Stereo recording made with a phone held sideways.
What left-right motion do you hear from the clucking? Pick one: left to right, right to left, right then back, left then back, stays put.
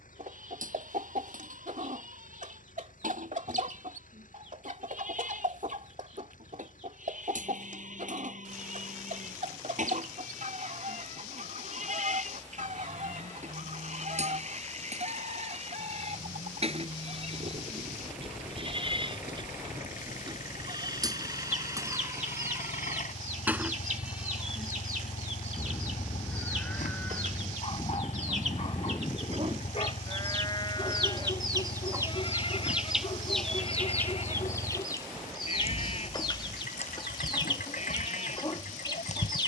right to left.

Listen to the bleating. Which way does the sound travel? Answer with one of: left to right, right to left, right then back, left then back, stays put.
right to left.